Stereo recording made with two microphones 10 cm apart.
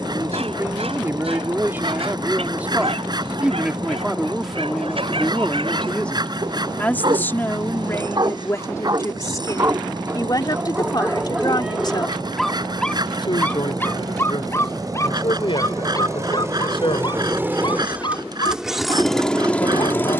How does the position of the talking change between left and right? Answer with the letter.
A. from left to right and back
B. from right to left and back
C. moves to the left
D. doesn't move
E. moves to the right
C.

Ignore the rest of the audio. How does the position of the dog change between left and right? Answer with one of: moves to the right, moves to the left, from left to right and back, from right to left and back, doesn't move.
moves to the left.